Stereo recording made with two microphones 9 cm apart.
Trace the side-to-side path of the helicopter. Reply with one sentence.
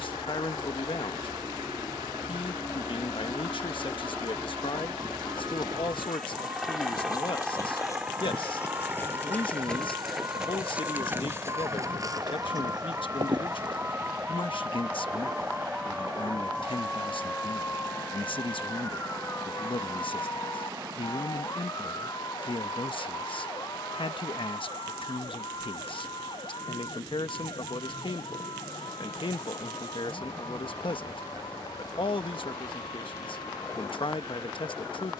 You can hear the helicopter travel towards the right.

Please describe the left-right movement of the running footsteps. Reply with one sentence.
You can hear the running footsteps move to the right.